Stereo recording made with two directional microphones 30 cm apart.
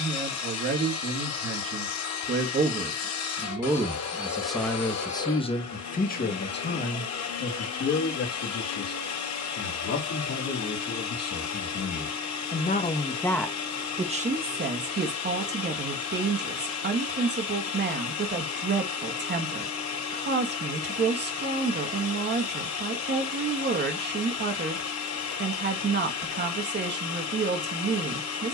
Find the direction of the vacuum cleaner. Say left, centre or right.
left.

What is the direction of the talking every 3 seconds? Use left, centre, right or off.
right, centre, left, left, centre, right, right, right, right, right.